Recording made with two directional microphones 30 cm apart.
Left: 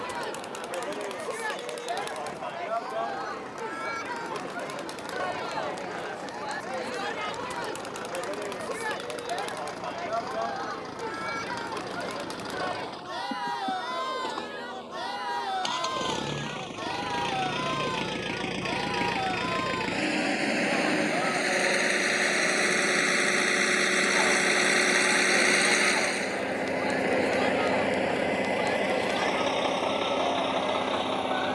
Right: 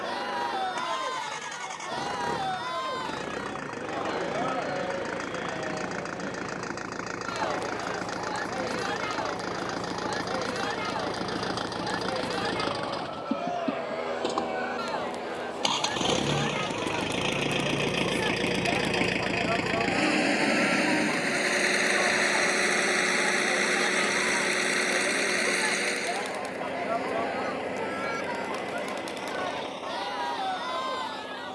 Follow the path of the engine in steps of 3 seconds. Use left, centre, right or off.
right, right, right, right, right, right, right, centre, left, left, left.